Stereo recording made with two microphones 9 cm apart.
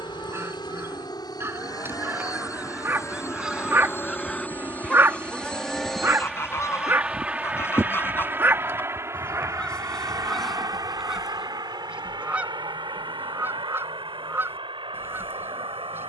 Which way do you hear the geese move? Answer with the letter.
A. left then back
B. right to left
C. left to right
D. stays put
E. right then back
A.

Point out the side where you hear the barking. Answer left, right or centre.
right.